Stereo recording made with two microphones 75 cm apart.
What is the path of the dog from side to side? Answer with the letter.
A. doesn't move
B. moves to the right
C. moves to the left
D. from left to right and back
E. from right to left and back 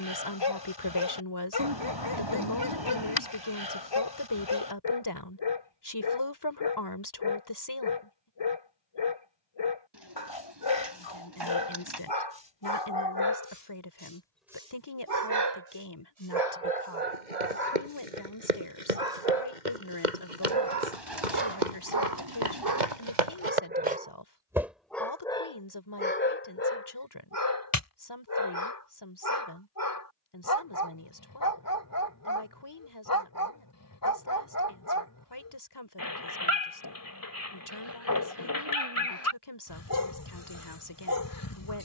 D.